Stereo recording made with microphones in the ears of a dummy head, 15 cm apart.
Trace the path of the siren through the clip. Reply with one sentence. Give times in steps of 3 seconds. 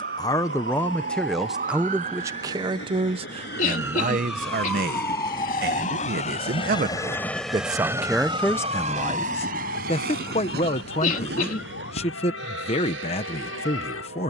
In this clip you hear the siren on the right from 0 s, in the centre from 3 s and on the left from 6 s.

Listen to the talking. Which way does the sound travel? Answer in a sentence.
In this clip you hear the talking move from left to right and back again.